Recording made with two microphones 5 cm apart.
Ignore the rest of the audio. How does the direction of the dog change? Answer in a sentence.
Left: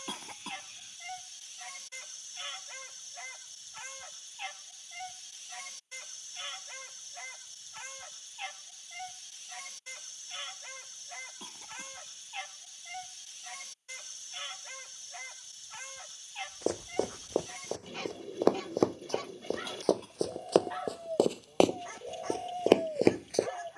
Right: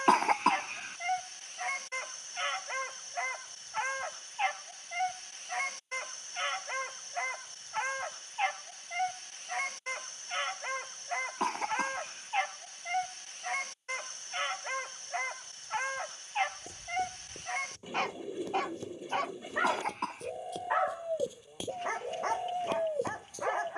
You can hear the dog stay in one place.